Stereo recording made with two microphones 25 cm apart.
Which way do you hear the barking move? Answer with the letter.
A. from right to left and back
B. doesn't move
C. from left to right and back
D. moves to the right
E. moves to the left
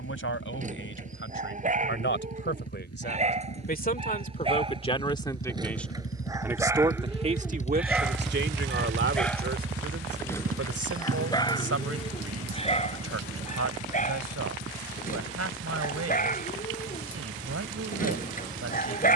E.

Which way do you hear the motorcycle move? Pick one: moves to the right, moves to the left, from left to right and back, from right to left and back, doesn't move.
moves to the right.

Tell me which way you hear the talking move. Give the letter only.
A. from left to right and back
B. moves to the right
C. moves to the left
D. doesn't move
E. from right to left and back
B.